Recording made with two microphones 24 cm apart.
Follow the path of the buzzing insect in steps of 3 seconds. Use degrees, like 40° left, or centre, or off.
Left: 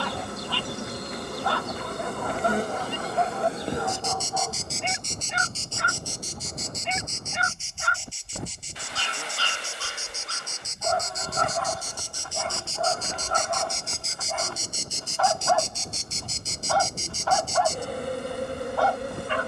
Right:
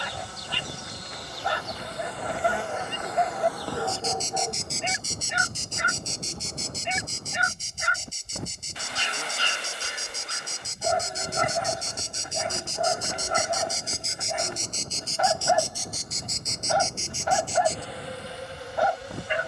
50° left, 10° left, 40° right, 40° right, 10° right, 30° left, 60° left.